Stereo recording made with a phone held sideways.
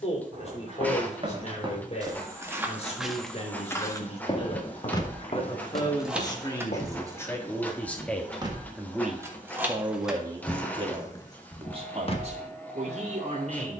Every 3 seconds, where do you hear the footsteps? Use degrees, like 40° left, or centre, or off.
30° right, 40° left, 60° left, off, off.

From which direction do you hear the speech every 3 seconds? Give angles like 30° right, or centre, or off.
50° left, 40° left, 20° left, 30° right, 60° right.